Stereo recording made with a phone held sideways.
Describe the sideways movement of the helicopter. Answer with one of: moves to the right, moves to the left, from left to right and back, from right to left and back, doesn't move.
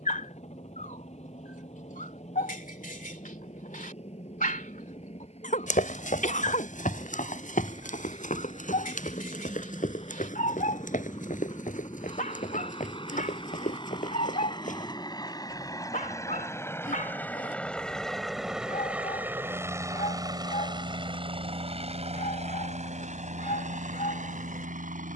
moves to the right.